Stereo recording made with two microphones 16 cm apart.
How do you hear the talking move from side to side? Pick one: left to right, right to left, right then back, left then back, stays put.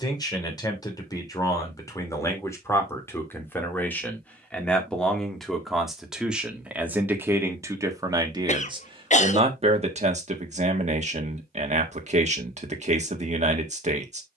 left to right.